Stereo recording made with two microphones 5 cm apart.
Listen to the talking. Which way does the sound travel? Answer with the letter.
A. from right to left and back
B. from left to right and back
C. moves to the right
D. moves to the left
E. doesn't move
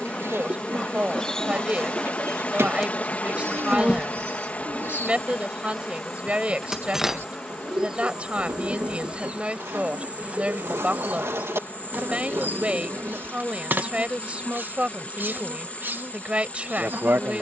E.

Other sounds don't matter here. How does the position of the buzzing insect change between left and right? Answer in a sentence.
You can hear the buzzing insect go from the left side to the right.